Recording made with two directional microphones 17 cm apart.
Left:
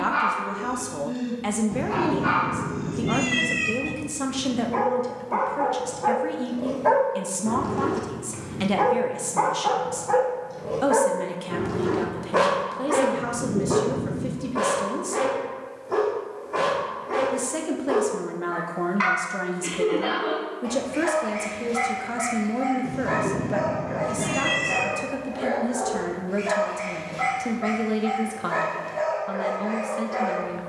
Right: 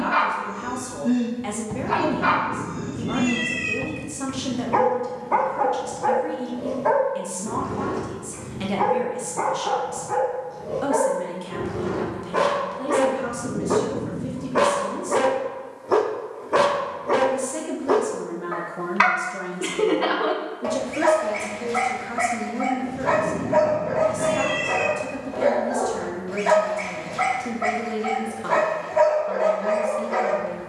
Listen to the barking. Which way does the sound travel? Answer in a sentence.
You can hear the barking go left and come back.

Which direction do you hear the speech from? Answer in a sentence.
In this clip you hear the speech on the left.